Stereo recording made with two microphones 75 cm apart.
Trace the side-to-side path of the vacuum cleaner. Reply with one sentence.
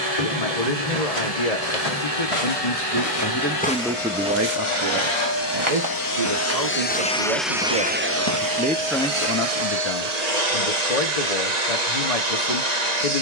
You can hear the vacuum cleaner move from left to right.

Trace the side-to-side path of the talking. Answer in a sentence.
You can hear the talking go right and come back.